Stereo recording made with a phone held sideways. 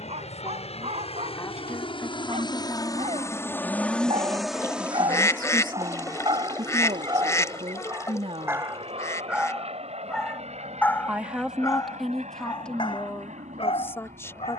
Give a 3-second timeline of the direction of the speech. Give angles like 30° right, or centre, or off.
20° left, 20° right, 50° right, 10° right, 10° left.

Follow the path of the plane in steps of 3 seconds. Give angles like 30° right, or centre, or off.
50° left, centre, 40° right, 50° right, 60° right.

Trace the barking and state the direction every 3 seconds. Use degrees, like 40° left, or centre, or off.
60° right, 50° right, 30° right, 10° left, 50° left.